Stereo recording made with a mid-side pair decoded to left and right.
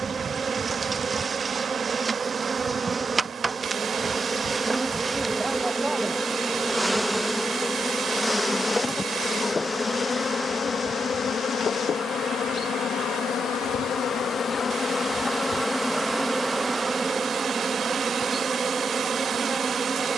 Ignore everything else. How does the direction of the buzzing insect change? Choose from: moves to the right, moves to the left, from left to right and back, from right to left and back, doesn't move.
from right to left and back.